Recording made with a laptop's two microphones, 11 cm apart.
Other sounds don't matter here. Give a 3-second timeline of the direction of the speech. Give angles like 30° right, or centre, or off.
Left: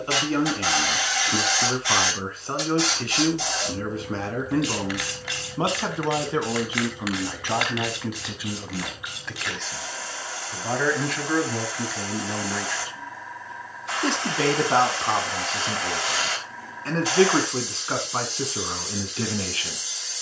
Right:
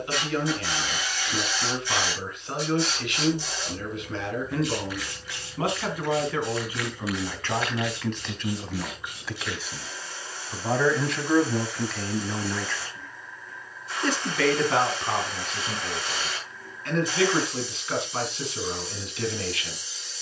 30° left, 30° left, 10° left, centre, 20° left, 30° left, 30° left.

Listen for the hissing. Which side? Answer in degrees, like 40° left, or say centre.
80° left.